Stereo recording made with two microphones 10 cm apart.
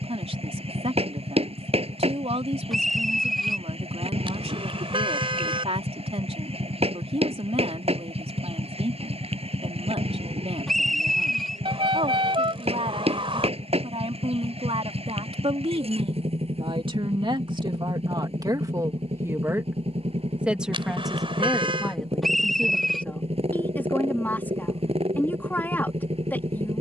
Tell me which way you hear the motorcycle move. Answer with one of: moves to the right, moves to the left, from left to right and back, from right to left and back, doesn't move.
doesn't move.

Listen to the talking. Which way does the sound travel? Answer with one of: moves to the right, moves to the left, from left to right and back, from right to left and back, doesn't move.
moves to the left.